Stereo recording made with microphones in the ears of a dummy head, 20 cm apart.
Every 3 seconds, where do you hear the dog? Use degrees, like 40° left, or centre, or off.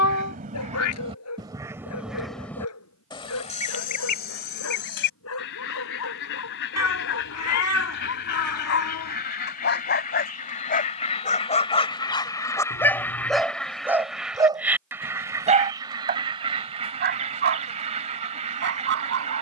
80° left, 70° left, 60° left, 40° left, centre, 40° right, 60° right.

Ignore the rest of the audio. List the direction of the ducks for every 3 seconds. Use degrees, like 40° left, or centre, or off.
20° right, 40° left, 50° left, 30° left, 10° left, 20° right, 30° right.